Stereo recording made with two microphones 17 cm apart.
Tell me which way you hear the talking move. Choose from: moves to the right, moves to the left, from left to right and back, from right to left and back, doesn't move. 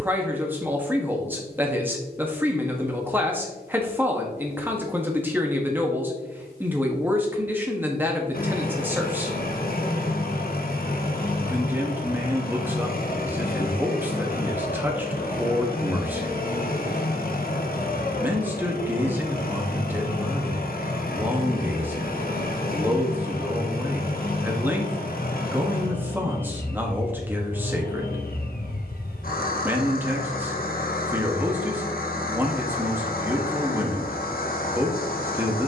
doesn't move.